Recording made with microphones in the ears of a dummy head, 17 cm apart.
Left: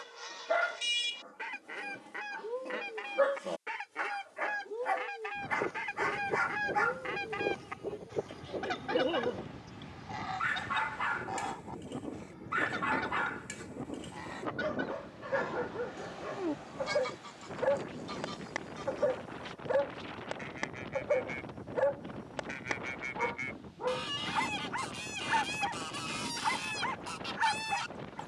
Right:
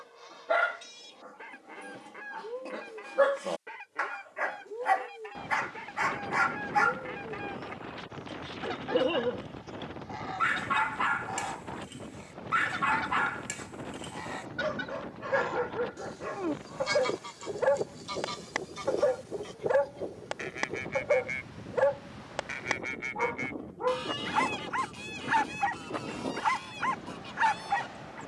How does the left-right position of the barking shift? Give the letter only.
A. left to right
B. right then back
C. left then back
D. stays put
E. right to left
D.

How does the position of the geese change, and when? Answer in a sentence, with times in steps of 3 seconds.
You can hear the geese on the left from 0 s, in the centre from 9 s, on the right from 15 s, in the centre from 21 s and on the left from 24 s.